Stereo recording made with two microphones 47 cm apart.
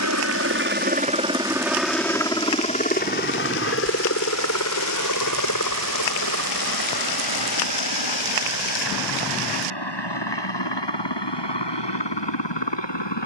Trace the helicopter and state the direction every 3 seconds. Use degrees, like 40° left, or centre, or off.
10° right, 30° left, 50° left, 50° left, 60° left.